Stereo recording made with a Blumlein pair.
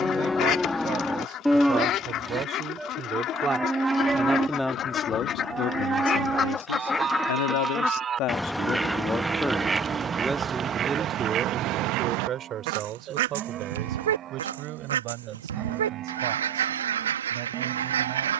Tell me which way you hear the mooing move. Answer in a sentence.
In this clip you hear the mooing move from left to right.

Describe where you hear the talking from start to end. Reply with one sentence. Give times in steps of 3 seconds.
In this clip you hear the talking on the right from 0 s, in the centre from 3 s, on the left from 6 s, in the centre from 9 s and on the right from 12 s.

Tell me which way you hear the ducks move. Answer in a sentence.
You can hear the ducks travel towards the right.